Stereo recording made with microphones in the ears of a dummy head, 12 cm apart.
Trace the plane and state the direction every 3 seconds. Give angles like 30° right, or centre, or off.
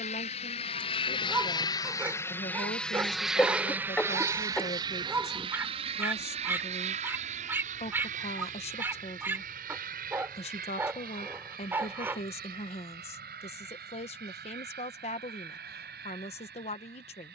30° left, 20° right, 50° right, 60° right, 70° right, 70° right.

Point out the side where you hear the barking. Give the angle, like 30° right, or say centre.
20° right.